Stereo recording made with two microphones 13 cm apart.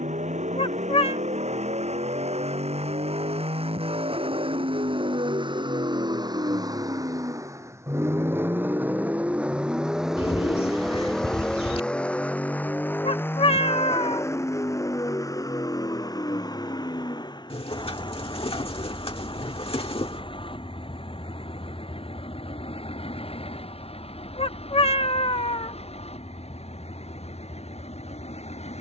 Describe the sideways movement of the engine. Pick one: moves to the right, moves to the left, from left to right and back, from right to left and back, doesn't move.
moves to the left.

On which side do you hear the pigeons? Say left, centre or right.
left.